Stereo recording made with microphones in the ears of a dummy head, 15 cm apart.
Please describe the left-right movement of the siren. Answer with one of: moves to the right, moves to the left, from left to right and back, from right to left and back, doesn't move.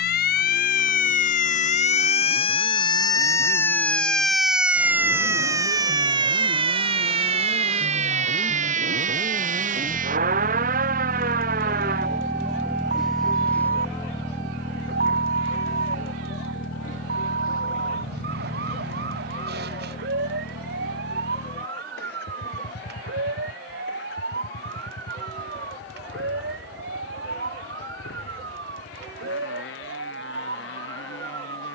moves to the right.